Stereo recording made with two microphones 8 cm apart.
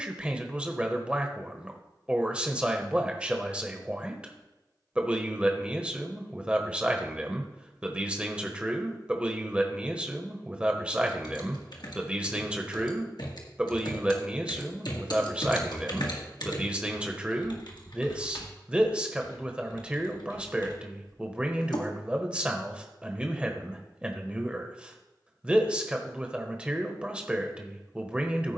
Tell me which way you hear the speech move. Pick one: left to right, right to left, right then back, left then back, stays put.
stays put.